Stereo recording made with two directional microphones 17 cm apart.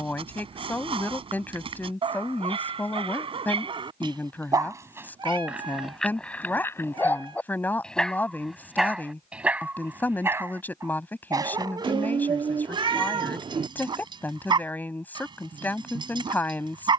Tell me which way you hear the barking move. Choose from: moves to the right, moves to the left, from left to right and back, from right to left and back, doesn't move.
from right to left and back.